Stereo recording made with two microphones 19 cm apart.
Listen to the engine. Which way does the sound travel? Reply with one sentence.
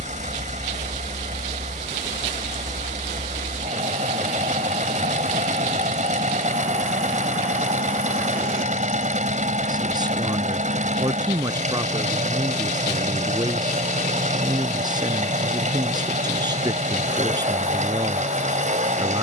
You can hear the engine stay in one place.